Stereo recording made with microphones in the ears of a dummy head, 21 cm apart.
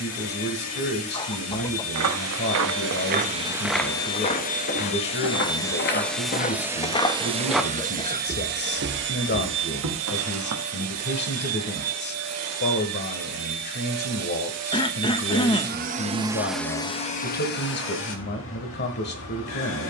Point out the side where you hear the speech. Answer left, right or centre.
left.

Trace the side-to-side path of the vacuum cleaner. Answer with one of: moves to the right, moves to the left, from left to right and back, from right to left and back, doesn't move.
from left to right and back.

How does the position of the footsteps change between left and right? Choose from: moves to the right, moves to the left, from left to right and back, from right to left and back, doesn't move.
from right to left and back.